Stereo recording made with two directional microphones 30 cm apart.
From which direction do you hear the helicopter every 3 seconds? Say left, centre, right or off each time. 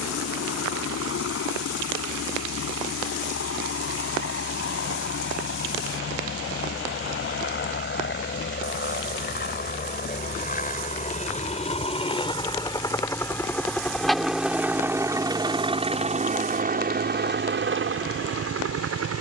left, left, left, left, centre, right, right.